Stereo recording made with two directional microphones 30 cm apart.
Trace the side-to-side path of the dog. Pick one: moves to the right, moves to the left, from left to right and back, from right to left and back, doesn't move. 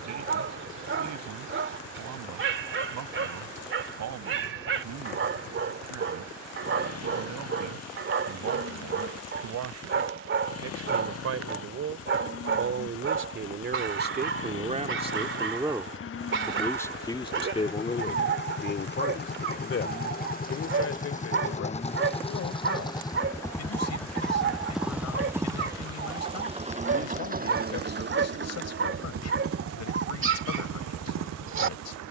doesn't move.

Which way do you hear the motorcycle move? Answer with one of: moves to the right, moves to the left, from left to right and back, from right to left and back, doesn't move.
moves to the right.